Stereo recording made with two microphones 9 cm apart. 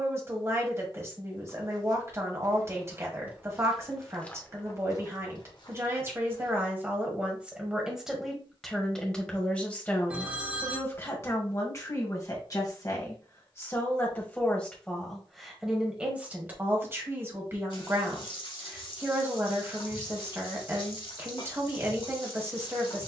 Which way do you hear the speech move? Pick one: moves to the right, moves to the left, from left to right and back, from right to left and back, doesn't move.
from right to left and back.